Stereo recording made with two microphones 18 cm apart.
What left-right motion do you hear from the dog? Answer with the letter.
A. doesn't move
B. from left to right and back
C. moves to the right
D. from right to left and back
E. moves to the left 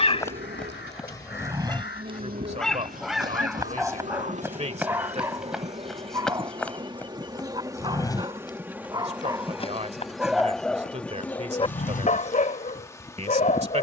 B.